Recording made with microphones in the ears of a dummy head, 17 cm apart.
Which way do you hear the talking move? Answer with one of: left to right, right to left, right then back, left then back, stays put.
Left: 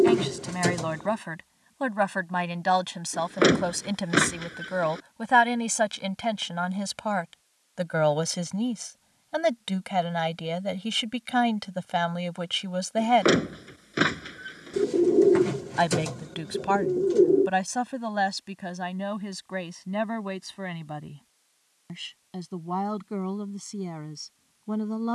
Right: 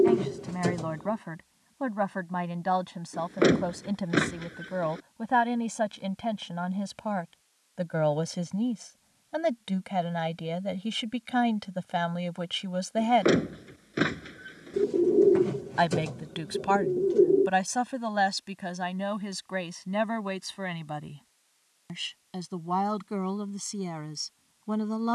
left to right.